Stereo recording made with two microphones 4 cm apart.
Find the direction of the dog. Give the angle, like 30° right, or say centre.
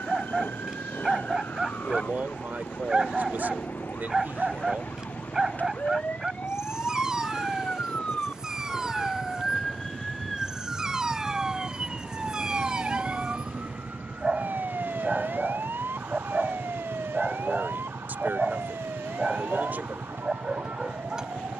20° right.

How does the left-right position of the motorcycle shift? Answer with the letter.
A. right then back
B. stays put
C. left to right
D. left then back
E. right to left
B.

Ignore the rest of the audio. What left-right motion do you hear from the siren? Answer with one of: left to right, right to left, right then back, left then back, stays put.
left to right.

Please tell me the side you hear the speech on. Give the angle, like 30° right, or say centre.
50° right.